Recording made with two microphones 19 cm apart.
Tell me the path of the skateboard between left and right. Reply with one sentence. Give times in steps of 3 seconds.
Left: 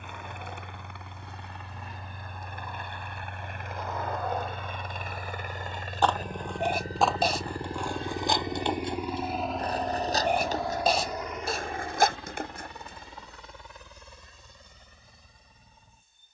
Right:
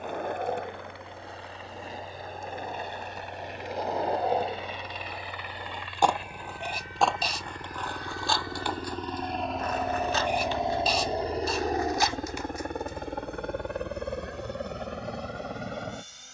You can hear the skateboard on the right from 0 s, in the centre from 6 s, on the left from 9 s and not at all from 15 s.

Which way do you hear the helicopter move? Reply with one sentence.
You can hear the helicopter move to the right.